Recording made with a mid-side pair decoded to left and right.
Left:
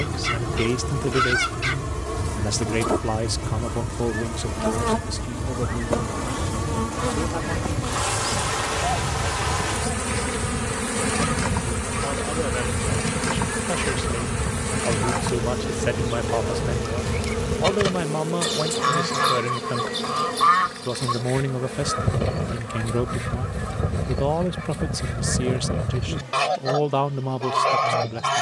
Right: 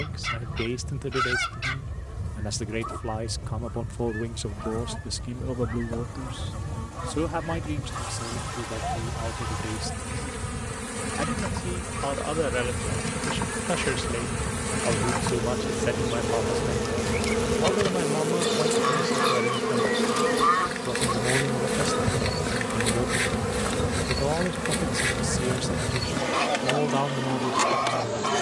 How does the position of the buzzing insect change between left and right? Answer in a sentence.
In this clip you hear the buzzing insect move from left to right.